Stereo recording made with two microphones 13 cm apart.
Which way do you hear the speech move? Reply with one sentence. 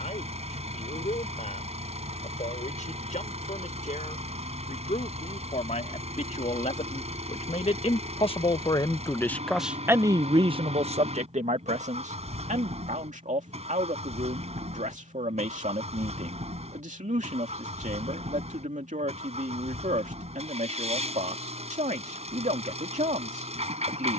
In this clip you hear the speech move to the right.